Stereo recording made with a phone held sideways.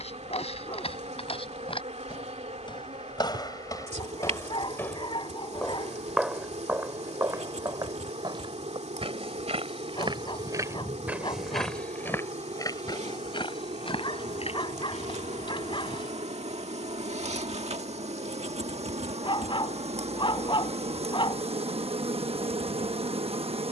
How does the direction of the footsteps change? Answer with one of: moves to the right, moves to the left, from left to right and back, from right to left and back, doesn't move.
from left to right and back.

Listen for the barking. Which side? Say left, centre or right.
left.